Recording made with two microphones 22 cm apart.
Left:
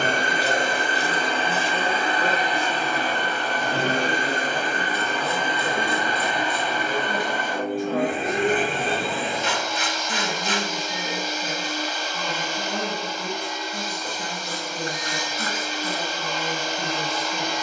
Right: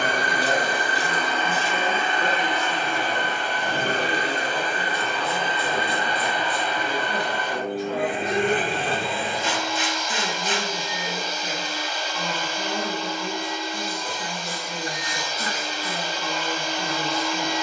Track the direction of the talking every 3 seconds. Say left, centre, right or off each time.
centre, left, left, left, left, left.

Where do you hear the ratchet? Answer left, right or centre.
left.